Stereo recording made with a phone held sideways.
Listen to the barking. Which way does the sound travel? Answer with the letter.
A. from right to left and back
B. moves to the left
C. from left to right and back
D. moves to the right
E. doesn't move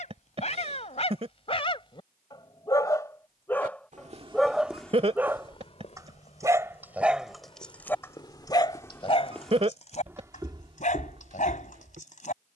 C.